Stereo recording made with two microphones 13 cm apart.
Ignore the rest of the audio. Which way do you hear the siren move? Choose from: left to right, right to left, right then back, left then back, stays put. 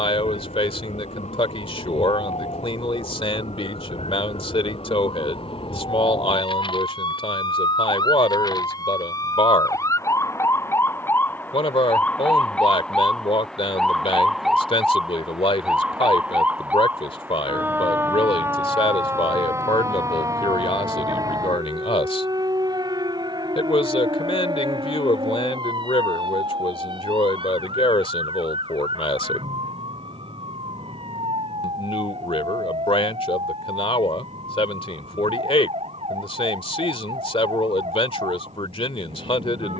left to right.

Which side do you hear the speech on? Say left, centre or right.
left.